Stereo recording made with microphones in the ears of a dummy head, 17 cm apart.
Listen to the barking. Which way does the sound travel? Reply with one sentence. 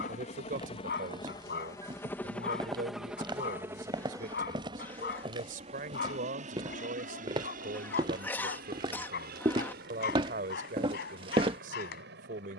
You can hear the barking stay in one place.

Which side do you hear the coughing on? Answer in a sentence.
You can hear the coughing in the centre.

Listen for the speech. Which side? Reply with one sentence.
In this clip you hear the speech on the right.